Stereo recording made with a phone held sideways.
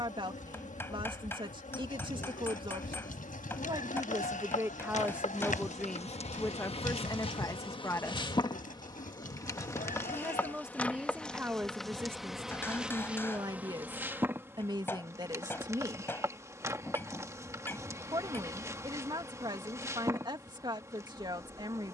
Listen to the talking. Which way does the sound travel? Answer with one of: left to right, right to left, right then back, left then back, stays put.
left then back.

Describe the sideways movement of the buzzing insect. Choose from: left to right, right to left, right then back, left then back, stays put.
left to right.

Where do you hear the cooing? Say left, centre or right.
left.